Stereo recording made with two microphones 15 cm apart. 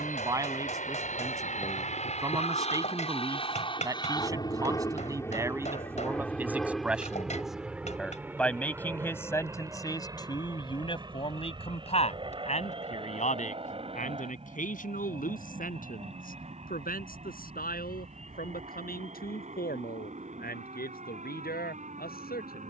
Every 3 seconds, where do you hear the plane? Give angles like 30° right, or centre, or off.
60° left, 30° left, centre, 20° right, 30° right, 40° right, 50° right, 50° right.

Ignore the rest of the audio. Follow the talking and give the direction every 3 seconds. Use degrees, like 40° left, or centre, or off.
20° right, 20° right, centre, 30° left, 60° left, 70° left, 80° left, 80° left.